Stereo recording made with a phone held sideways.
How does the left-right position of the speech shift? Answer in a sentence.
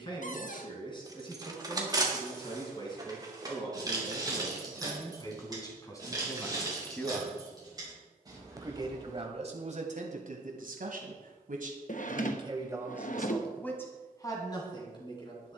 You can hear the speech move from left to right and back again.